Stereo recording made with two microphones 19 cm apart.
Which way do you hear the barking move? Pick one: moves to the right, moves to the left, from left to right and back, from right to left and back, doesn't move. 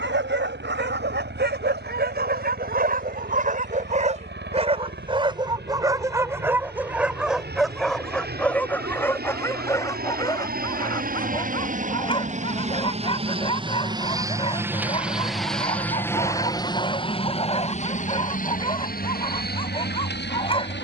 moves to the left.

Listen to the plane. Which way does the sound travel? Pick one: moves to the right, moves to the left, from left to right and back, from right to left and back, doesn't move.
moves to the left.